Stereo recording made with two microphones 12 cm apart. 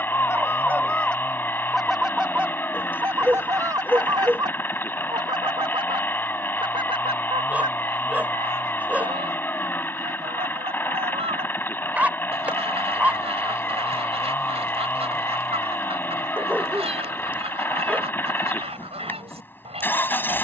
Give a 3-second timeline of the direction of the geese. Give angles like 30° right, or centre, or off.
centre, 40° right, 60° right, 70° right, 70° right, 70° right, 70° right.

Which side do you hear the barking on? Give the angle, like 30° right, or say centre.
10° right.